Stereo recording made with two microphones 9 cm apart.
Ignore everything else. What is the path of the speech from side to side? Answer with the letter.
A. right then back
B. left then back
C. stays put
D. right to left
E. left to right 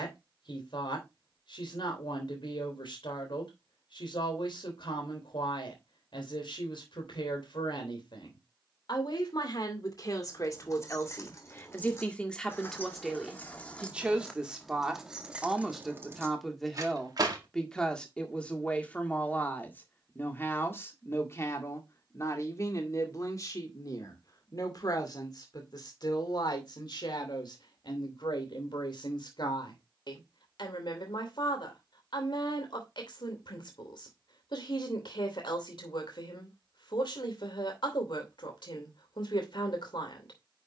A.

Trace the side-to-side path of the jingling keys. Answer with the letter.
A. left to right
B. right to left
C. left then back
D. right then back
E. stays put
A.